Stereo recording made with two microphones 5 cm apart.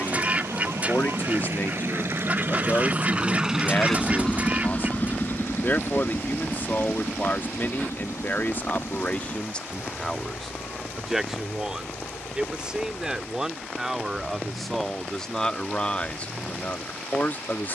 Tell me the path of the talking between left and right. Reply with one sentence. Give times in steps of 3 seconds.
You can hear the talking on the left from 0 s, in the centre from 9 s and on the left from 15 s.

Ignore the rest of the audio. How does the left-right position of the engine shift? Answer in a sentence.
In this clip you hear the engine move to the left.